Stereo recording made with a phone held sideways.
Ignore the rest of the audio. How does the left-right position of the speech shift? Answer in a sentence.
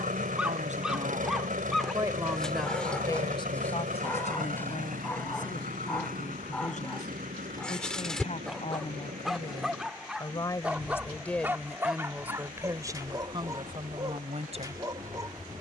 In this clip you hear the speech go left and come back.